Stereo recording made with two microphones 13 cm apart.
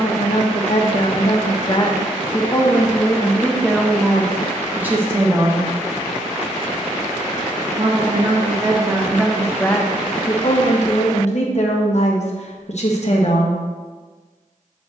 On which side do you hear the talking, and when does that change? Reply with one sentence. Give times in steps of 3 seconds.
You can hear the talking on the left from 0 s, in the centre from 3 s, on the right from 6 s and on the left from 9 s.